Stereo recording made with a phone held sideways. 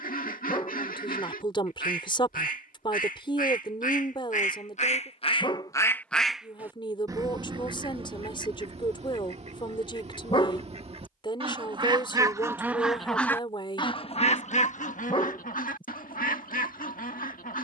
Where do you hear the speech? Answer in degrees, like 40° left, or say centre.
40° left.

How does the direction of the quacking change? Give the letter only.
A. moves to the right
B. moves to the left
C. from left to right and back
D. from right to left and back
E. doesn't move
C.